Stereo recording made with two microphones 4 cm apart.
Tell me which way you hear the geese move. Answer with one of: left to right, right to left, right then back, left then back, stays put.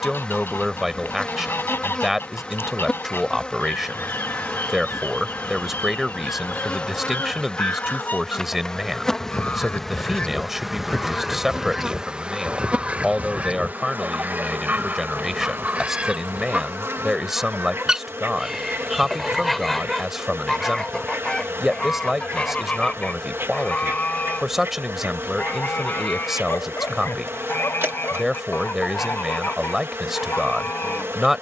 right then back.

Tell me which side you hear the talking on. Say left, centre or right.
centre.